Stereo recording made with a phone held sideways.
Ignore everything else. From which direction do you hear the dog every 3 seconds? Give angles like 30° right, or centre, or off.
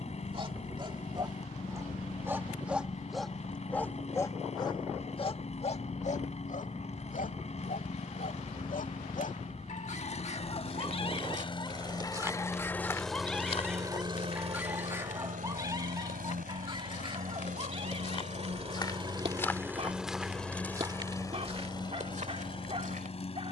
20° right, 20° left, 60° left, 40° left, centre, 30° right, 40° right, 40° right.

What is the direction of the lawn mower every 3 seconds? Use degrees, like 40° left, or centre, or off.
50° left, 50° left, 50° left, 40° left, 10° right, 70° right, 20° right, 30° left.